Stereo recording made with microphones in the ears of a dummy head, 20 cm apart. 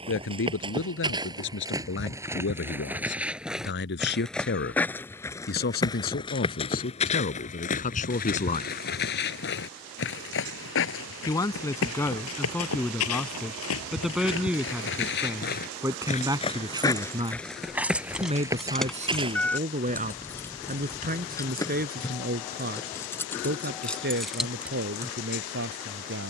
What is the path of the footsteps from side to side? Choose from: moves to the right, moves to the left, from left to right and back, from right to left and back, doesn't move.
from right to left and back.